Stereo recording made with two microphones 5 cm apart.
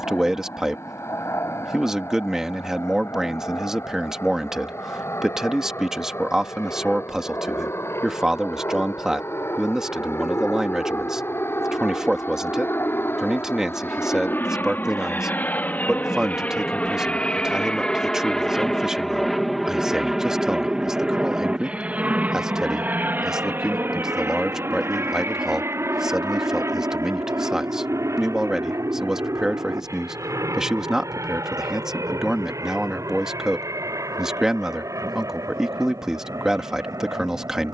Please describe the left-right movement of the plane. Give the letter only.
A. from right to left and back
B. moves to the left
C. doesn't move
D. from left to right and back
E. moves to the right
E.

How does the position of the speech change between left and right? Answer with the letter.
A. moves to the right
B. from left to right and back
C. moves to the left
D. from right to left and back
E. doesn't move
E.